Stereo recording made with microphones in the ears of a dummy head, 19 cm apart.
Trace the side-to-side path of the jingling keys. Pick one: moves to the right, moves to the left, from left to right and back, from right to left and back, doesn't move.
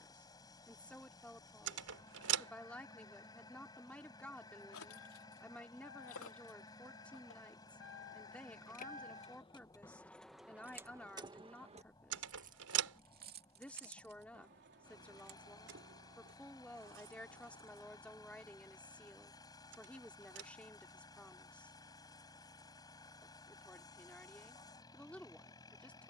moves to the right.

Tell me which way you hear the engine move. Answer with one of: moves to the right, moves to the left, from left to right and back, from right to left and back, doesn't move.
doesn't move.